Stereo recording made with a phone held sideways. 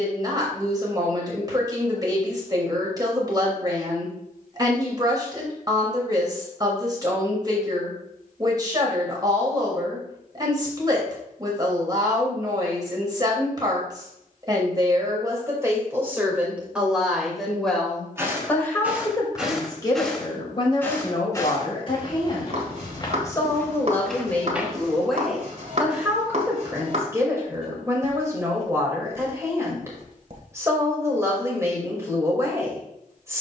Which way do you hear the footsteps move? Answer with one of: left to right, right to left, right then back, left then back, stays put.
left then back.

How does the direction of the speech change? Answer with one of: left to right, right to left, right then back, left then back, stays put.
left then back.